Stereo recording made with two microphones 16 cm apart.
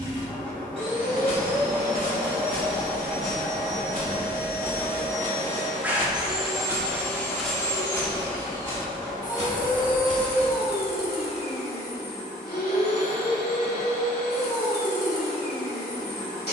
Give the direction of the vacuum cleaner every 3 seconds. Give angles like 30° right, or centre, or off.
40° right, 20° right, 20° left, 70° left, 80° left, 80° left.